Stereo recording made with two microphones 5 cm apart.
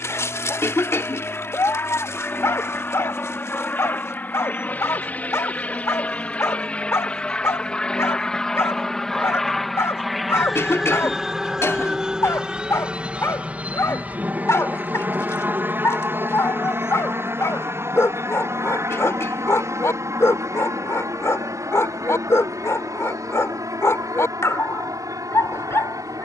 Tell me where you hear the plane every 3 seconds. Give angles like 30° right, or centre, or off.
40° left, 30° left, 20° left, centre, 20° right, 40° right, 50° right, 60° right, 70° right.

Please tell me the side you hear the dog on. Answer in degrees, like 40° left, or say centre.
60° left.